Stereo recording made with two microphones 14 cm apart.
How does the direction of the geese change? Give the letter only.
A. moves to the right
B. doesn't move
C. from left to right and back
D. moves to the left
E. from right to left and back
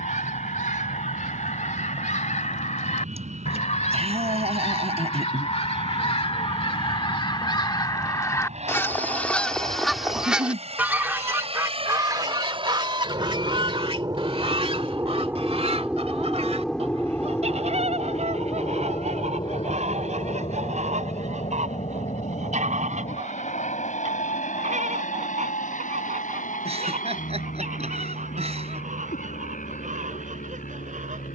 A.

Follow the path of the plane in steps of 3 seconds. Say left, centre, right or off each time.
right, right, right, right, right, centre, left, left, left, left, left.